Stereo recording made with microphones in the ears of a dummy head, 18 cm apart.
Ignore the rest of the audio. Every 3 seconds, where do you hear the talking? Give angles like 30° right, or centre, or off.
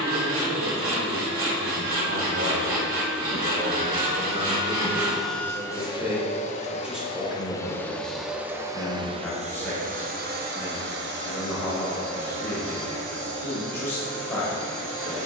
60° right, 30° right, centre, 10° left, 10° left.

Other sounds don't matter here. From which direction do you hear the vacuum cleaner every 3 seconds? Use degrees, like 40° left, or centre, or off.
70° right, 20° right, 10° left, 50° right, 70° right.